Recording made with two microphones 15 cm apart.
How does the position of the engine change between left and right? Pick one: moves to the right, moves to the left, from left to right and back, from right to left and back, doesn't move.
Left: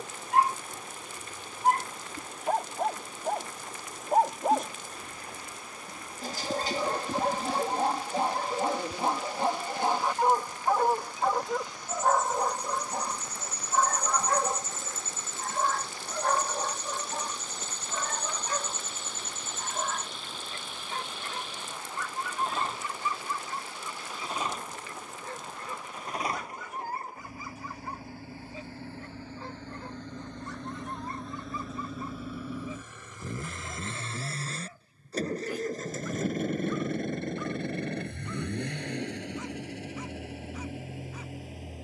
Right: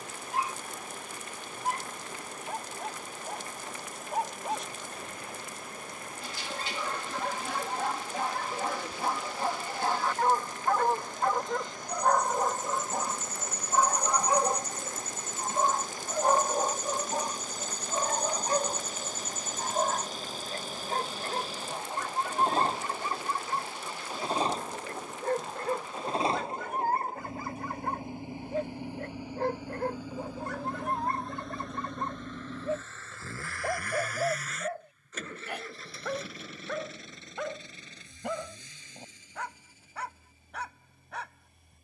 moves to the left.